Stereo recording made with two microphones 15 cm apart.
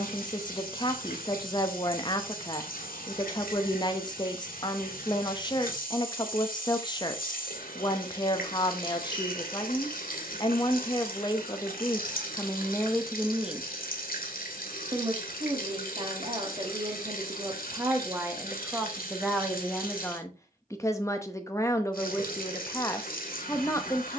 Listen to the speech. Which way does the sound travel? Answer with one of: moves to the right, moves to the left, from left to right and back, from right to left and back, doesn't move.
from left to right and back.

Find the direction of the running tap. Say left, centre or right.
left.